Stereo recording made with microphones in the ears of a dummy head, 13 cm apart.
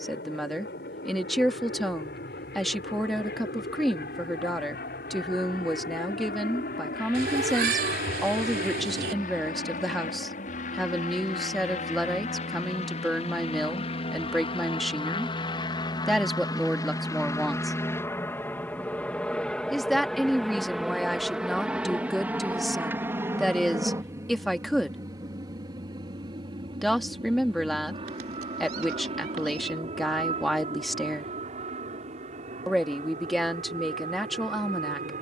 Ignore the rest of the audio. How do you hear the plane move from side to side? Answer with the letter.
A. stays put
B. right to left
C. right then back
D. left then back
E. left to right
E.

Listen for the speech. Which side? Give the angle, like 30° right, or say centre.
centre.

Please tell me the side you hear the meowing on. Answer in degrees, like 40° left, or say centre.
60° right.